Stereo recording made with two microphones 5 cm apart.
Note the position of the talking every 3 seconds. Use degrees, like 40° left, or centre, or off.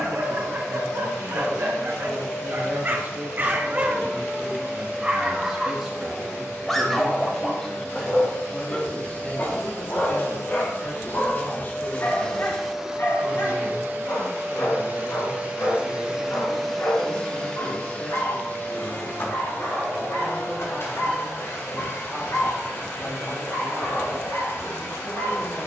50° right, 20° right, 10° left, 40° left, 50° left, 60° left, 60° left, 60° left, 70° left.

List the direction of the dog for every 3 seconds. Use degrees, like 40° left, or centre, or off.
50° right, 20° right, 10° left, 40° left, 50° left, 60° left, 60° left, 70° left, 70° left.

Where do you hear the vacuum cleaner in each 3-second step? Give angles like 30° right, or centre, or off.
60° left, 60° left, 60° left, 50° left, 20° right, centre, 50° left, 60° left, 60° left.